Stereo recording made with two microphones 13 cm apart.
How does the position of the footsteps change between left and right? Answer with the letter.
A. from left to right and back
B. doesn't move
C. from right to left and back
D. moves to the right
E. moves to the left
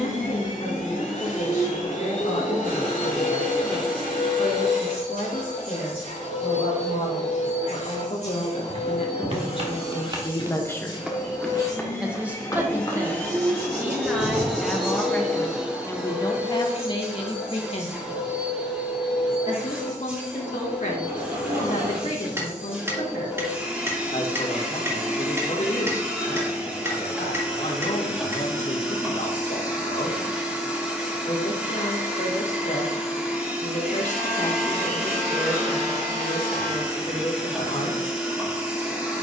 E.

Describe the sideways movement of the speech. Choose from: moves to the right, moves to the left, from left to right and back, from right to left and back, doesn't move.
from left to right and back.